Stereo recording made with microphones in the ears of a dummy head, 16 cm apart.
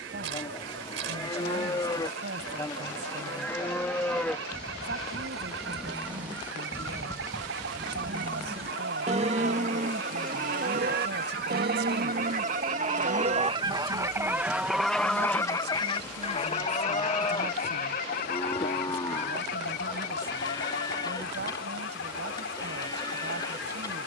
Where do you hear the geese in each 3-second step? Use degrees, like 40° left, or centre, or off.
80° right, 80° right, 70° right, 60° right, 30° right, 30° left, 60° left, 70° left.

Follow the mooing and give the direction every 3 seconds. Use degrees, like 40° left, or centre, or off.
20° left, 10° left, 20° right, 50° right, 40° right, 20° left, 20° left, 20° left.